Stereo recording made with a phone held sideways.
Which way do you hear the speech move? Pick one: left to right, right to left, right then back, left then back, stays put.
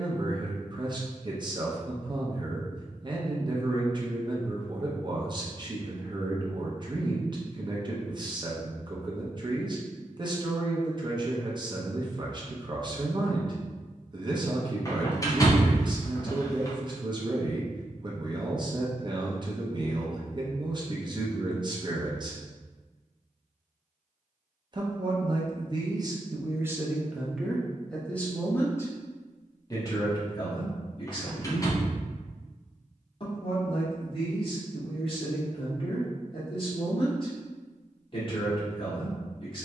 right to left.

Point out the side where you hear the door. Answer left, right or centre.
left.